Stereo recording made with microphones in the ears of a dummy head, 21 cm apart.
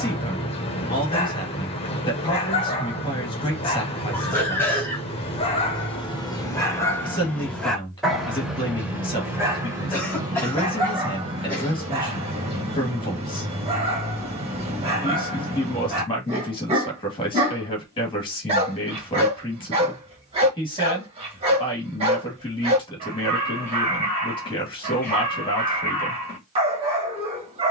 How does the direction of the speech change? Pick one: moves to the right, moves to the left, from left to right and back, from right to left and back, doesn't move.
doesn't move.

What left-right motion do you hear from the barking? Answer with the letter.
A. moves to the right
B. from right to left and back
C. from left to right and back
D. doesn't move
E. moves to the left
A.